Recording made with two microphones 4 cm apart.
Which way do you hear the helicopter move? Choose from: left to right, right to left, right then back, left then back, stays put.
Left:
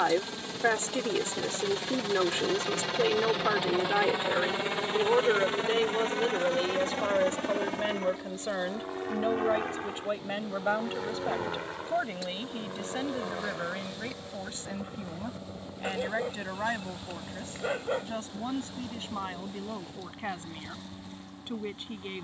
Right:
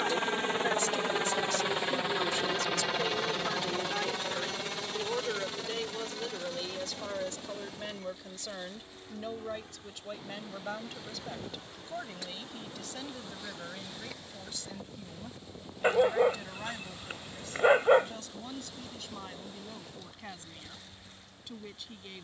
right to left.